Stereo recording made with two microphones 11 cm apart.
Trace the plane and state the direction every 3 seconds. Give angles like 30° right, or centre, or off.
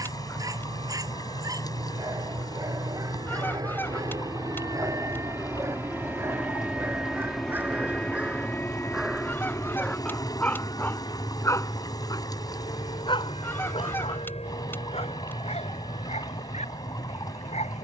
50° right, 30° right, centre, 30° left, 50° left, 60° left.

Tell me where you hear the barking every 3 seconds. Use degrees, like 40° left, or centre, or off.
30° right, 30° right, 20° right, 10° left, 50° left, 70° left.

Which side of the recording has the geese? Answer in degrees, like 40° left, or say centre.
20° left.